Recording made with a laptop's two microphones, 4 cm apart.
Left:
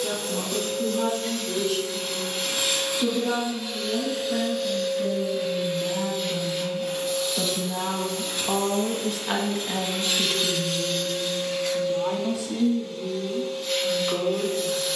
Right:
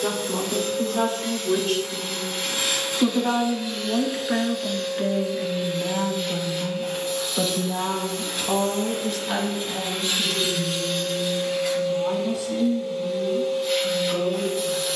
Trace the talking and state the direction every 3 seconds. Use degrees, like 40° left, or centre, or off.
70° right, 50° right, 10° right, 30° left, 60° left.